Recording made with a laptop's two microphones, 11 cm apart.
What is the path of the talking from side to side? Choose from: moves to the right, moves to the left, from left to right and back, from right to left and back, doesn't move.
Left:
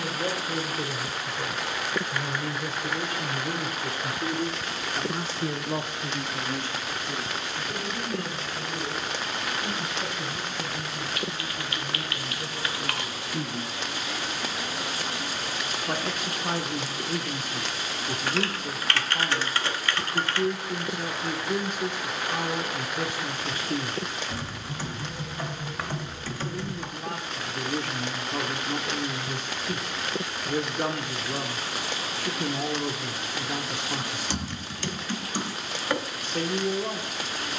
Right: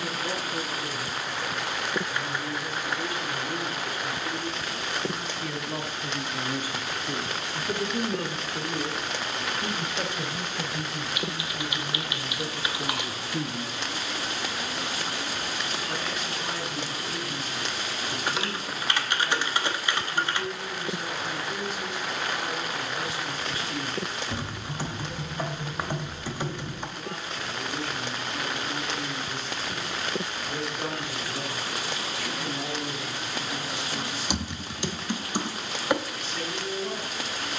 from left to right and back.